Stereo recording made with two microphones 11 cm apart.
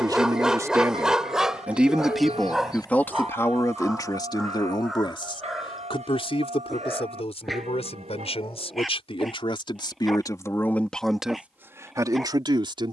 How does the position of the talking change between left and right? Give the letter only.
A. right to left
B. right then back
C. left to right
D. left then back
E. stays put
D.